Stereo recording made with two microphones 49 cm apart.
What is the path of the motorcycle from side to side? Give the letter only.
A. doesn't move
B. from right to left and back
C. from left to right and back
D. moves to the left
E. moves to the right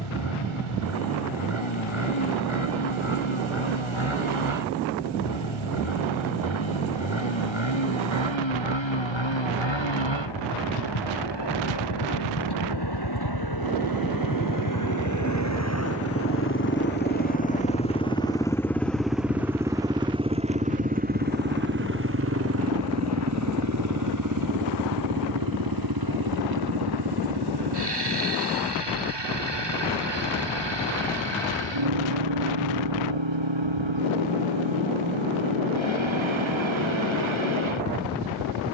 E.